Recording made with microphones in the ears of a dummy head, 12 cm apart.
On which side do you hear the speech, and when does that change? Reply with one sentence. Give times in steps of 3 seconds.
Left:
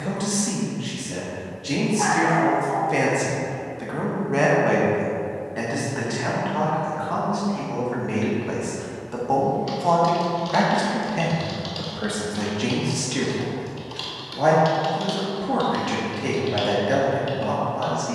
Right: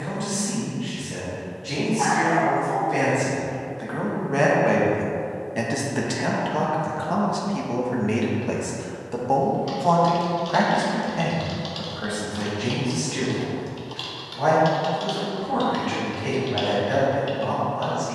You can hear the speech on the left from 0 s, in the centre from 3 s, on the right from 6 s, in the centre from 9 s and on the left from 12 s.